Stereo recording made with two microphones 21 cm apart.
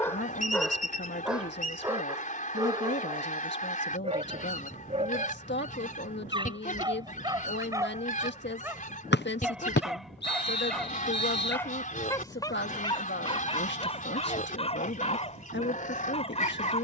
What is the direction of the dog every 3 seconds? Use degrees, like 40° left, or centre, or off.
centre, 30° right, 20° right, centre, 20° left, 30° left.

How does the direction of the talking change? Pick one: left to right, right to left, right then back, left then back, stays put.
stays put.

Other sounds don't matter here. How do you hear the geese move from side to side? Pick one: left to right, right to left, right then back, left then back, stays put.
stays put.